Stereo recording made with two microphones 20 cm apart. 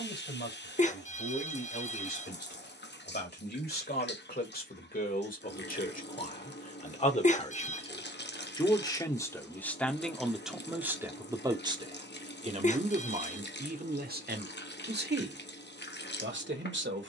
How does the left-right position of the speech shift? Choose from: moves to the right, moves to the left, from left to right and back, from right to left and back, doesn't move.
moves to the right.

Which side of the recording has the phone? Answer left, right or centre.
left.